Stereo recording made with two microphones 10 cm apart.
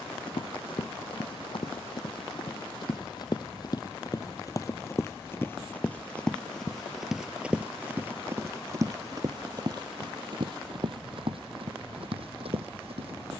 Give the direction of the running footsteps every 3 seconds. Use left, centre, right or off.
left, left, centre, right, right.